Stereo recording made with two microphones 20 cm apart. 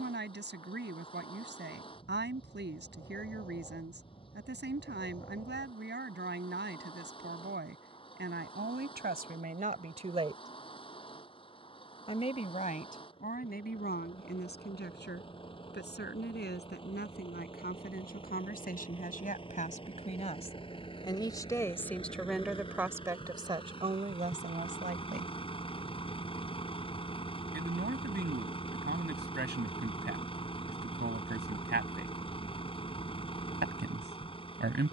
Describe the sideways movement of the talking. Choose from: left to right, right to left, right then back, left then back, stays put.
left then back.